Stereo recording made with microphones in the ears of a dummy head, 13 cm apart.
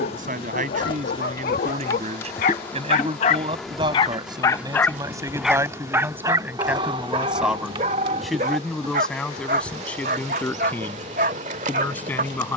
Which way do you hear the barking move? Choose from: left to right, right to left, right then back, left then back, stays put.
left to right.